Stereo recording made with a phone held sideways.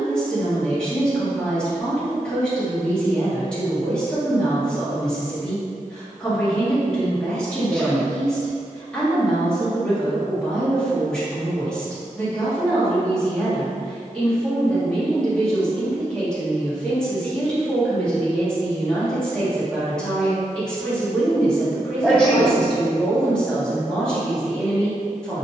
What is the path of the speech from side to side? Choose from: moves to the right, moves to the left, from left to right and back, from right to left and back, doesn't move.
doesn't move.